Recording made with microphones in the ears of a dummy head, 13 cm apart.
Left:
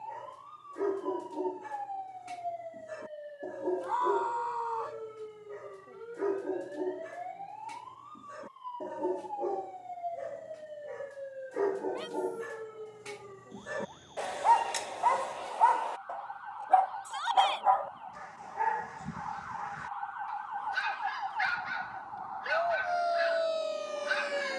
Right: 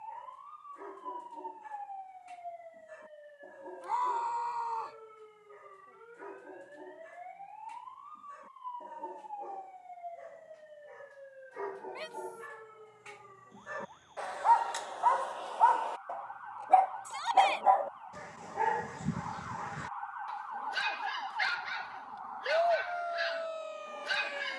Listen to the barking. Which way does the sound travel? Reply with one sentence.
You can hear the barking move to the right.